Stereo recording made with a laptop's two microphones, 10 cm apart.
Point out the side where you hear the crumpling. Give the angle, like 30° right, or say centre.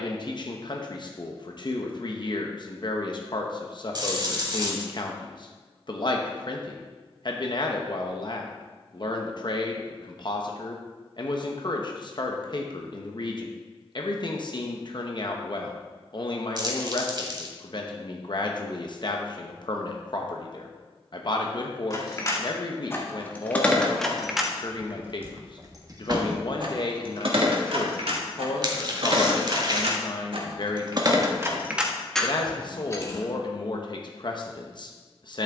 40° right.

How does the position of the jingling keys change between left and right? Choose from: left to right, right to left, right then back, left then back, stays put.
right then back.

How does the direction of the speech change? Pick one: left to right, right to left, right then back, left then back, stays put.
stays put.